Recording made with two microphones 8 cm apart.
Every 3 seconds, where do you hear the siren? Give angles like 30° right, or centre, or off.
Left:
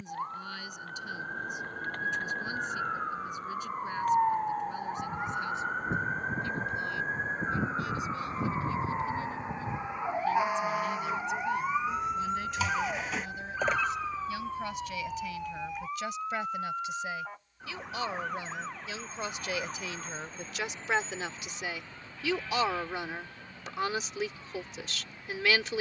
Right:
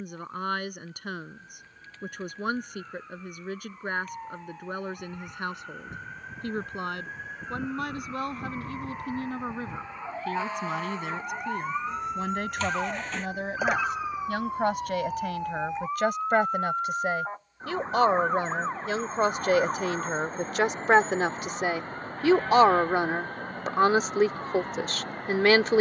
60° left, 50° left, 30° left, 10° left, 10° right, 30° right, 40° right, 50° right, 50° right.